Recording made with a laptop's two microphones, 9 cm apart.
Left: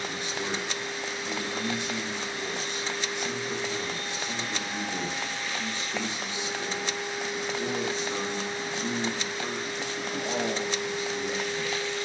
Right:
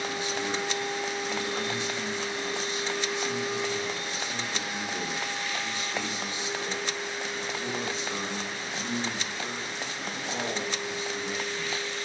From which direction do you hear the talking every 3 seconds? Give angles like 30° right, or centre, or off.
50° left, 40° left, 10° left, 30° left.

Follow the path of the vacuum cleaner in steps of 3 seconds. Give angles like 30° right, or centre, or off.
20° right, 10° right, 20° left, 60° left.